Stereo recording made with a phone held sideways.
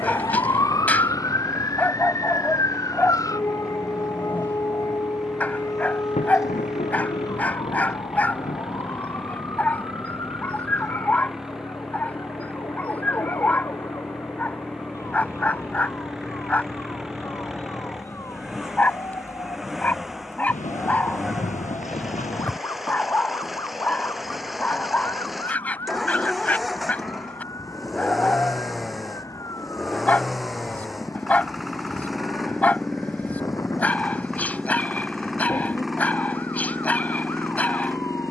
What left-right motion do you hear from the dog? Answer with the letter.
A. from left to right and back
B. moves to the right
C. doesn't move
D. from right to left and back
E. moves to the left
C.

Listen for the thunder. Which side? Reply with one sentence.
In this clip you hear the thunder on the left.